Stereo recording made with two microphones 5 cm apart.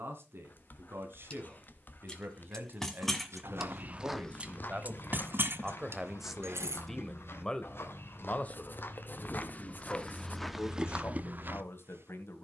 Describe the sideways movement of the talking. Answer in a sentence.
In this clip you hear the talking travel towards the left.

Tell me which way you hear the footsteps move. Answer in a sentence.
In this clip you hear the footsteps go left and come back.